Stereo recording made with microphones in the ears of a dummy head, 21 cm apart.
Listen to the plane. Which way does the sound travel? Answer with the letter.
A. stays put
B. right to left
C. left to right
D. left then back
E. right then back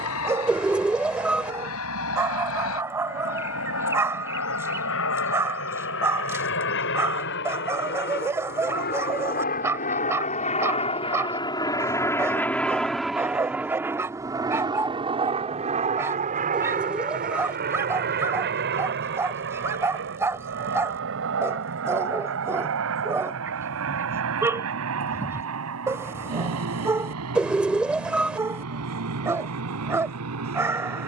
C.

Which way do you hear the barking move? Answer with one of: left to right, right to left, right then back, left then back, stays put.
stays put.